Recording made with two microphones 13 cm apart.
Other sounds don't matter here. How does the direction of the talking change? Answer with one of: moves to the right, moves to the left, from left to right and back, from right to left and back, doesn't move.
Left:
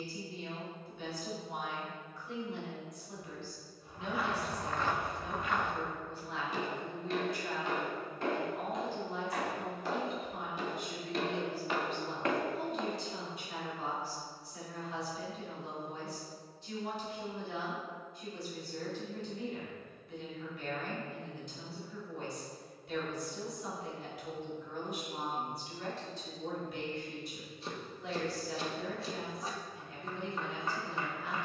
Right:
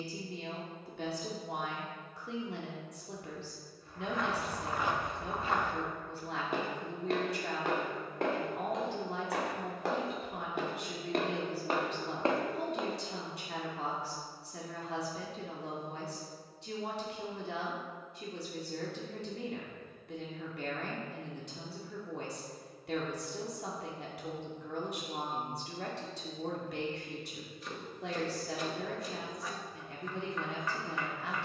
doesn't move.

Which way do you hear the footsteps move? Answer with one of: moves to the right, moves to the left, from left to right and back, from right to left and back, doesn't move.
from left to right and back.